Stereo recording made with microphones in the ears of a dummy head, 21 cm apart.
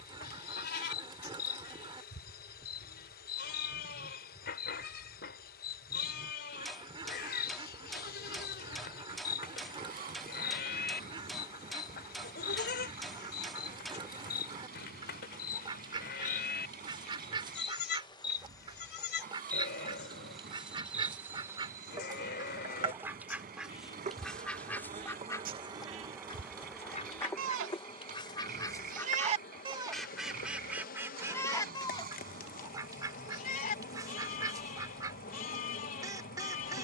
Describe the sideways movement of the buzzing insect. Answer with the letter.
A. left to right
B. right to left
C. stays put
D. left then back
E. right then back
E.